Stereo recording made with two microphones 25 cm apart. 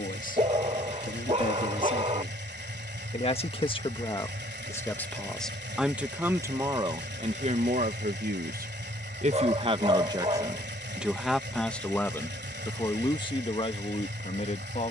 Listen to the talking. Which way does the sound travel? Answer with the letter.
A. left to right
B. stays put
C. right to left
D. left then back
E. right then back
E.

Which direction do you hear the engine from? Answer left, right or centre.
right.